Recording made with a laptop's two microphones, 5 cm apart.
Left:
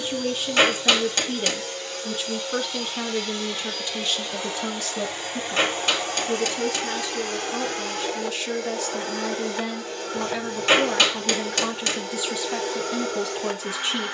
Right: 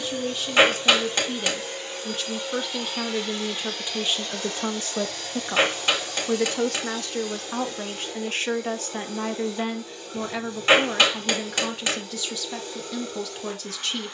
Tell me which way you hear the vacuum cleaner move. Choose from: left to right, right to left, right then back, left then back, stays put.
right to left.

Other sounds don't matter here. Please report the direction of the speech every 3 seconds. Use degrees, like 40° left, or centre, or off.
10° left, 30° right, 50° right, 10° right, 10° left.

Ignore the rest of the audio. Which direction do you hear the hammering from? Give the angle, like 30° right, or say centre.
10° right.